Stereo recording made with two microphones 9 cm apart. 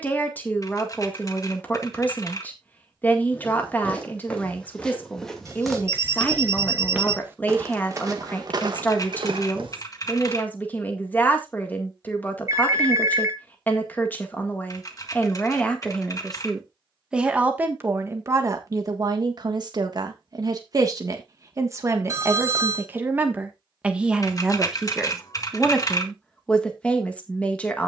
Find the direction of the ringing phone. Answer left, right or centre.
right.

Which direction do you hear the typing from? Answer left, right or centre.
left.